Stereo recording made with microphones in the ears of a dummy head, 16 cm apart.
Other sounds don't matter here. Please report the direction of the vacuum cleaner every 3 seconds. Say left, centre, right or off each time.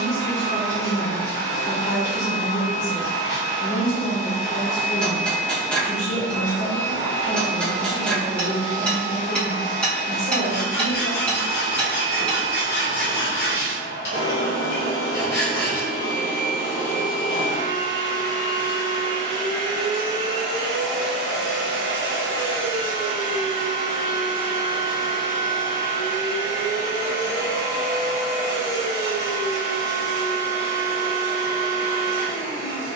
left, left, left, left, left, left, centre, centre, left, left, left.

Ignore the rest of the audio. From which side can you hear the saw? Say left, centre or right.
left.